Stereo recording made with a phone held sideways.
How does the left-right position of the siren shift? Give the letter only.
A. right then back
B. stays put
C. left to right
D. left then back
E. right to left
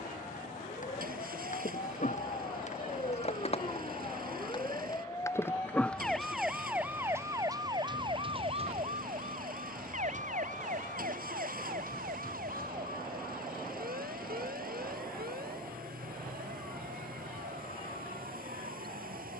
C.